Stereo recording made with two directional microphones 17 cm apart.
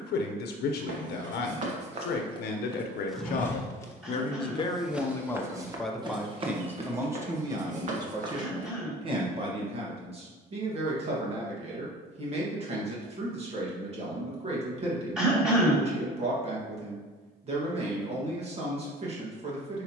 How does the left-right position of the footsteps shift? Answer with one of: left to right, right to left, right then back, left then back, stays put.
left then back.